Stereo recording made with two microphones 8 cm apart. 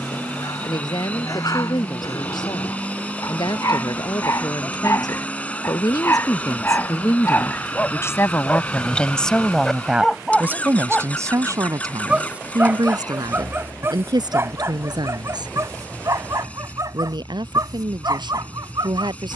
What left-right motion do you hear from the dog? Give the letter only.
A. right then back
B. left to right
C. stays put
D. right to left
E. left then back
B.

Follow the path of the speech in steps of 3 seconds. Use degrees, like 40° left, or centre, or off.
70° left, 70° left, 40° left, 20° right, 70° right, 80° right, 80° right.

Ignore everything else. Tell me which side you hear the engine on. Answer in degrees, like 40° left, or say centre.
20° left.